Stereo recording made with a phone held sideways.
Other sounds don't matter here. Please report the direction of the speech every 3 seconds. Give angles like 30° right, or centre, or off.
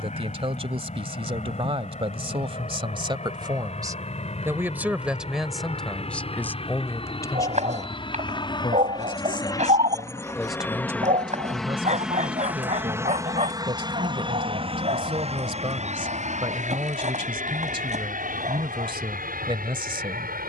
40° right, 20° right, 20° left, centre, 40° right, 40° right, 40° right.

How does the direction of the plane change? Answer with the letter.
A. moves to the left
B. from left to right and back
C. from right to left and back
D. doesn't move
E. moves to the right
E.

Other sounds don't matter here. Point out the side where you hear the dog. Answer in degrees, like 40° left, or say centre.
60° right.